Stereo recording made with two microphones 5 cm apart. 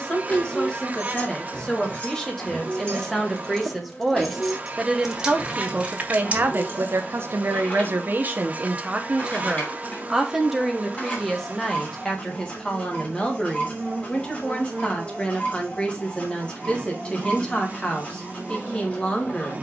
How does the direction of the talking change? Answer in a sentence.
You can hear the talking move from left to right and back again.